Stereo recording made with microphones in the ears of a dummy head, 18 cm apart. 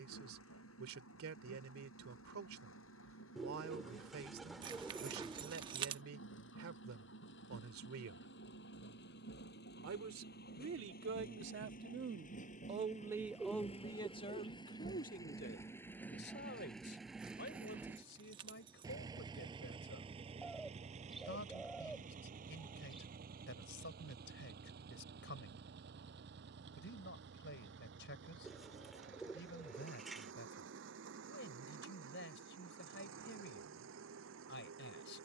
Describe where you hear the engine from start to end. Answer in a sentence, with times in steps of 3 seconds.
You can hear the engine on the left from 0 s, in the centre from 15 s and on the right from 18 s.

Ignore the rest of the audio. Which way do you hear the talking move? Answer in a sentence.
You can hear the talking travel towards the left.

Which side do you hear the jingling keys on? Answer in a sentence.
In this clip you hear the jingling keys on the right.